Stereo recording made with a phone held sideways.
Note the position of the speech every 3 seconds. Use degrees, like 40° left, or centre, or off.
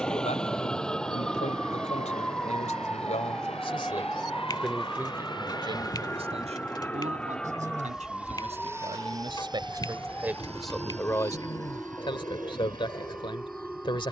50° left, 10° left, 50° right, 10° right, 30° left.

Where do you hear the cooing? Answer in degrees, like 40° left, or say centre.
30° left.